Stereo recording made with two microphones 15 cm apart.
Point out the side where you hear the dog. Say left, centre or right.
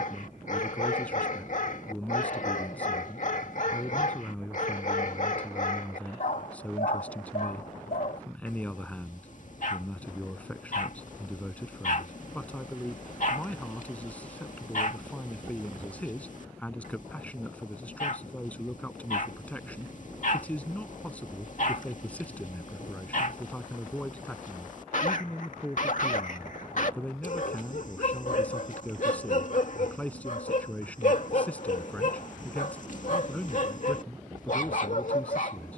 left.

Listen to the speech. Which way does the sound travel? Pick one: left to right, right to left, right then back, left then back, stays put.
stays put.